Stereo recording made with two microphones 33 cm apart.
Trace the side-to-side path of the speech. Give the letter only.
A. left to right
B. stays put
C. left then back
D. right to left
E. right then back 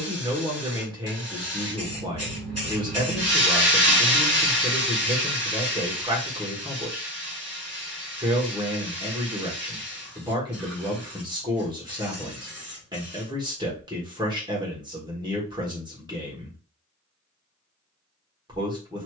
B.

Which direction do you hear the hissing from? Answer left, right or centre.
right.